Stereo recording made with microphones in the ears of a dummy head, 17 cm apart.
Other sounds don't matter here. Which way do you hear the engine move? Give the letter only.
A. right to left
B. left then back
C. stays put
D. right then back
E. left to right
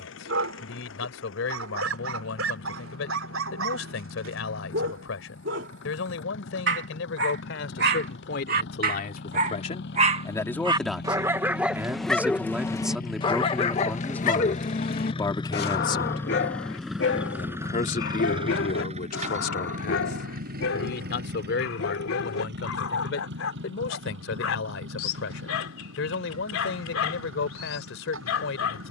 E.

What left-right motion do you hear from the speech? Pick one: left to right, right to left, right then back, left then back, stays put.
right then back.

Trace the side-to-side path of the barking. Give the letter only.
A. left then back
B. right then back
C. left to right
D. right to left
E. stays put
D.